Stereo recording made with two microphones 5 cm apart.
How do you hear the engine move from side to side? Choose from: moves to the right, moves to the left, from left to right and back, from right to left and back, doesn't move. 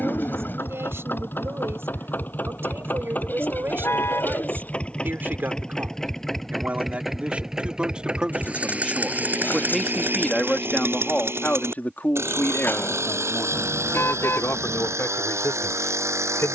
moves to the right.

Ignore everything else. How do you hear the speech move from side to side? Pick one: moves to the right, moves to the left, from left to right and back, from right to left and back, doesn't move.
moves to the left.